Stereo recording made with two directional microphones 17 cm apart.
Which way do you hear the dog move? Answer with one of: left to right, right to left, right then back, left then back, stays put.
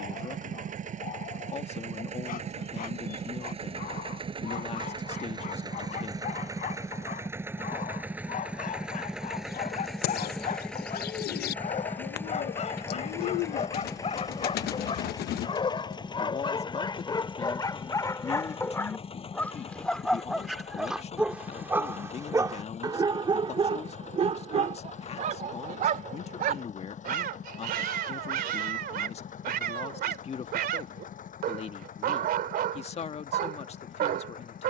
left to right.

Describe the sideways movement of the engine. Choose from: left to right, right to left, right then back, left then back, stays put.
right to left.